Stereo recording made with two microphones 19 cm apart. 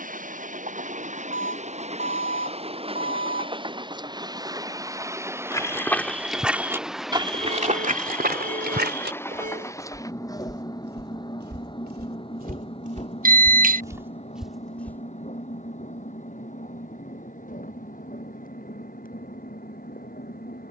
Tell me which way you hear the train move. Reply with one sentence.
You can hear the train travel towards the left.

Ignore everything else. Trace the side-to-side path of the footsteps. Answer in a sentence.
In this clip you hear the footsteps move from left to right and back again.